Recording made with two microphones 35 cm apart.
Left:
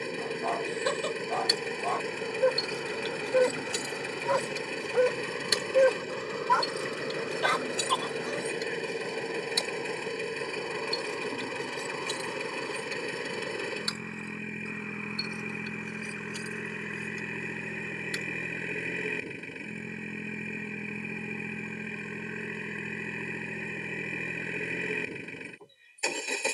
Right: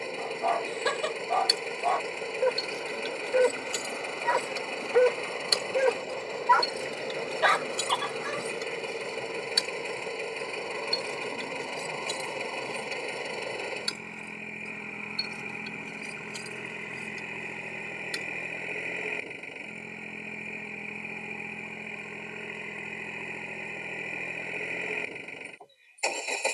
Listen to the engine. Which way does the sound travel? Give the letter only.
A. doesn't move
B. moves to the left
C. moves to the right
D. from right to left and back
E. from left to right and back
A.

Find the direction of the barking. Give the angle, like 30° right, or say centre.
70° right.